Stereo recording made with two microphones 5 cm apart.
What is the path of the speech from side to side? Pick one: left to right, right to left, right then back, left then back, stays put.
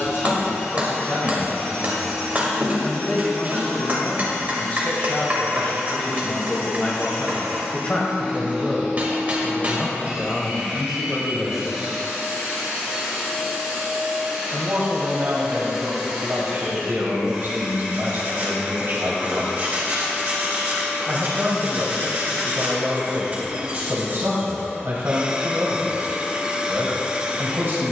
left to right.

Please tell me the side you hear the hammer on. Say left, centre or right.
right.